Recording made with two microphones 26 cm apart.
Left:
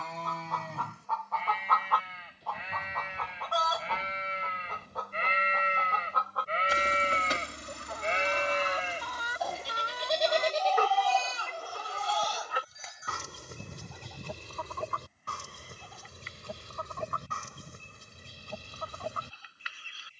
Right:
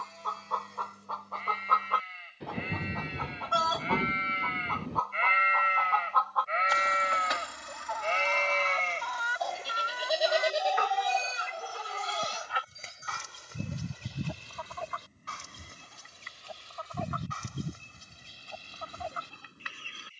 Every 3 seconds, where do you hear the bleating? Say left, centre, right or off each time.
left, left, left, centre, right, right, right.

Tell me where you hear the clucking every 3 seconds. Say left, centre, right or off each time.
right, centre, left, left, left, left, left.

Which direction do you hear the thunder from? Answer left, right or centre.
right.